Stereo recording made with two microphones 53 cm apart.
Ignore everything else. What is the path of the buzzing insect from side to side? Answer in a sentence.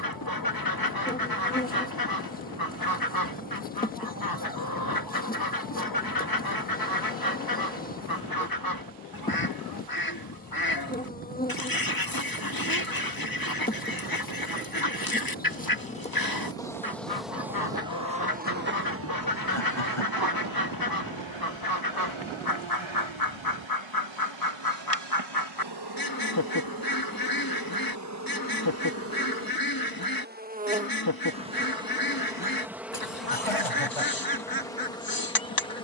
You can hear the buzzing insect move from left to right and back again.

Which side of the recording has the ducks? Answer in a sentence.
You can hear the ducks on the left.